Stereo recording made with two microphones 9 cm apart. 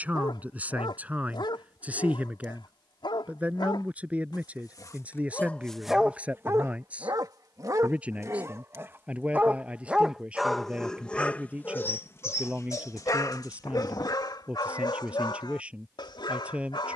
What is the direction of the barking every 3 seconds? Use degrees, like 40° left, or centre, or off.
70° left, 40° left, 40° right, 10° left, 50° left, 60° left.